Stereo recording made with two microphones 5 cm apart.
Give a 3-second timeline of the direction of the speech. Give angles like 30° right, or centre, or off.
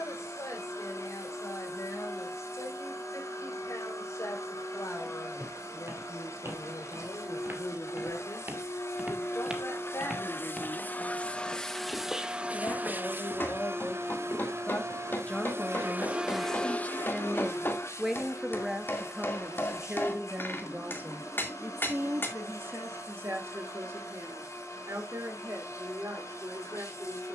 70° left, 70° left, 60° left, 60° left, 40° left, 20° left, 20° right, 50° right, 60° right.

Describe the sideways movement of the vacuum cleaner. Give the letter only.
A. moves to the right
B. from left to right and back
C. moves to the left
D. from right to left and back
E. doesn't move
B.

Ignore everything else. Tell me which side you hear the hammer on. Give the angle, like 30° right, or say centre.
40° left.